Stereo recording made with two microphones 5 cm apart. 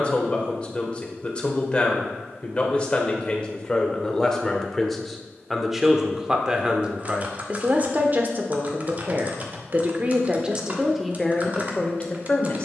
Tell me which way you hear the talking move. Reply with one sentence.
In this clip you hear the talking move from left to right and back again.